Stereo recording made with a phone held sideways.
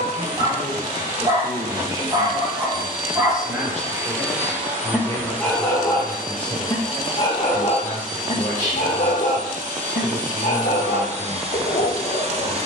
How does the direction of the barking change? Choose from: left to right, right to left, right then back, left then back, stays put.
right to left.